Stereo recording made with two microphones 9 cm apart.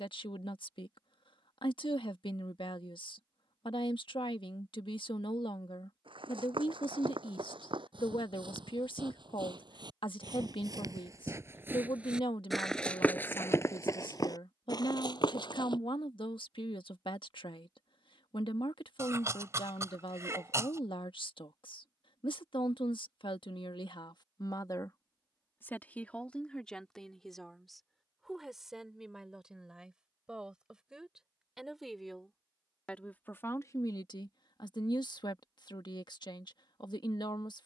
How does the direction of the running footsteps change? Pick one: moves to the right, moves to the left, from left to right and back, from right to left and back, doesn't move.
moves to the left.